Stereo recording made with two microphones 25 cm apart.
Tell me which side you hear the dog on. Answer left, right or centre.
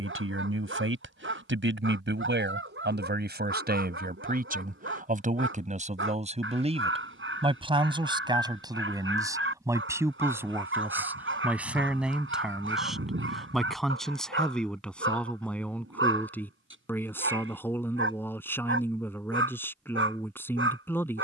right.